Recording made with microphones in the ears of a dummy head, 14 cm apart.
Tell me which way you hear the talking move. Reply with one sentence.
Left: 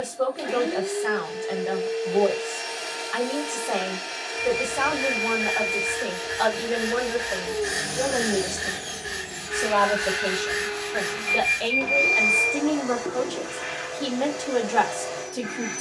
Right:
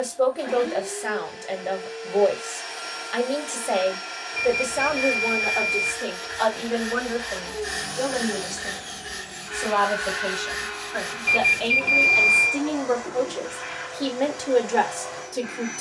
In this clip you hear the talking go left and come back.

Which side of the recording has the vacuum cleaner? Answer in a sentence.
You can hear the vacuum cleaner on the left.